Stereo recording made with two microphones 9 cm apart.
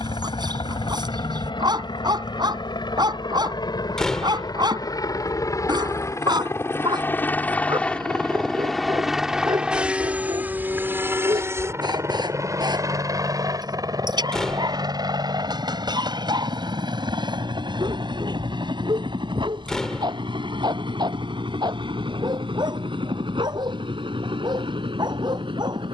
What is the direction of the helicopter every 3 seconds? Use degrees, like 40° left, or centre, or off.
60° left, 50° left, 20° left, 20° right, 40° right, 50° right, 60° right, 60° right, 70° right.